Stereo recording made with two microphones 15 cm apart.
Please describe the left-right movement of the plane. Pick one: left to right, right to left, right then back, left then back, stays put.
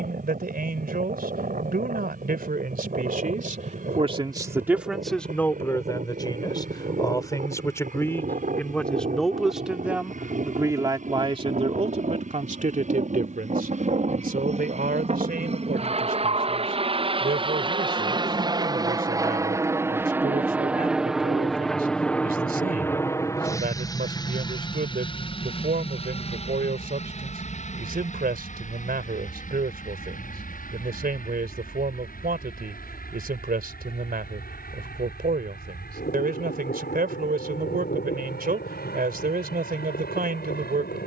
right to left.